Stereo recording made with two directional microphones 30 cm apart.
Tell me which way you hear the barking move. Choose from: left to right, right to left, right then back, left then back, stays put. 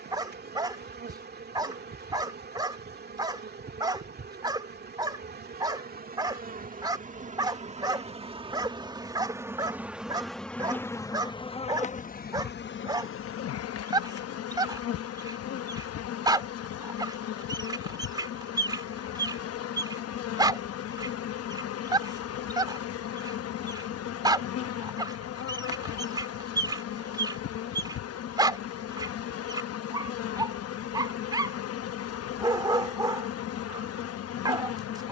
stays put.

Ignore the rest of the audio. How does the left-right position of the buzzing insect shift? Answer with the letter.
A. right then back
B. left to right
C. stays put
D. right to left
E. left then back
D.